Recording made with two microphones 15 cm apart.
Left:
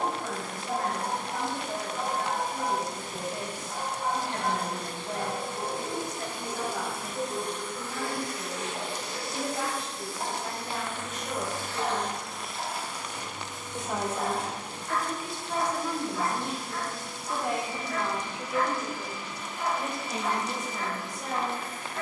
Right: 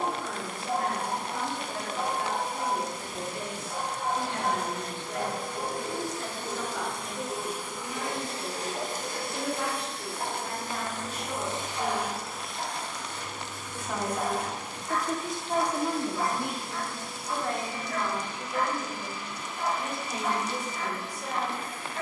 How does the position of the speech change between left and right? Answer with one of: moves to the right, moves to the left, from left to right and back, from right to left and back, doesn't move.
from left to right and back.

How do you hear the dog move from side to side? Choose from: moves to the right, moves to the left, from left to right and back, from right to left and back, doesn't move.
doesn't move.